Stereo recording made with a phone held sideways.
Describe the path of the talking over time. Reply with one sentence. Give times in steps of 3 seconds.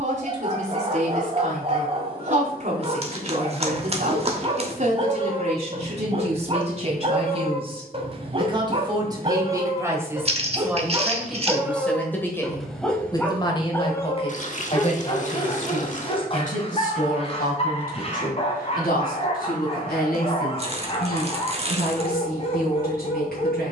You can hear the talking on the right from 0 s, in the centre from 9 s and on the left from 12 s.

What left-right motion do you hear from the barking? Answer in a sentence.
In this clip you hear the barking go from the right side to the left.